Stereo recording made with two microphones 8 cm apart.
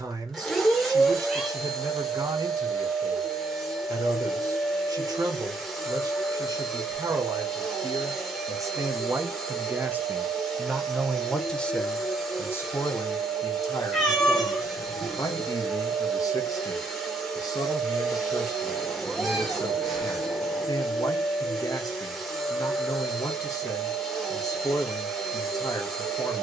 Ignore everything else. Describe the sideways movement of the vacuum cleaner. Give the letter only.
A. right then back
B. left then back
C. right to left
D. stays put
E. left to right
D.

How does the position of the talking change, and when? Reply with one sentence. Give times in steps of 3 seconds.
You can hear the talking on the right from 0 s, in the centre from 9 s and on the left from 12 s.